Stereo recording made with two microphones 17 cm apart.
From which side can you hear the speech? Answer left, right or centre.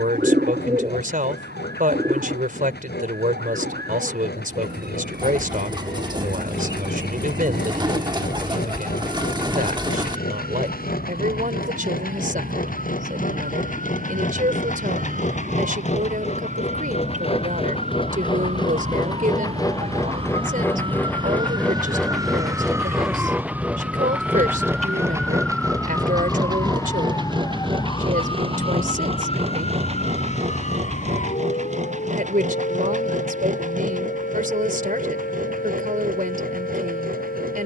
right.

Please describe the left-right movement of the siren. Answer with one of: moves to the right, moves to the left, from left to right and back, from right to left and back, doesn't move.
moves to the left.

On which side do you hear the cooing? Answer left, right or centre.
right.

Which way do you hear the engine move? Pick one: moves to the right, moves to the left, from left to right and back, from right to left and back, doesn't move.
moves to the right.